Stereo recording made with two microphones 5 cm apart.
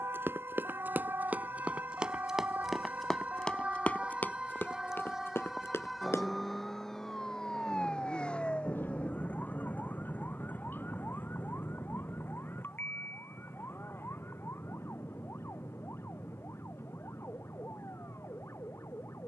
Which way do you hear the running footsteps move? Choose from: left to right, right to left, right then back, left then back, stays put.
right to left.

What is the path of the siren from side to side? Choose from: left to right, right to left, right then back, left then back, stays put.
right to left.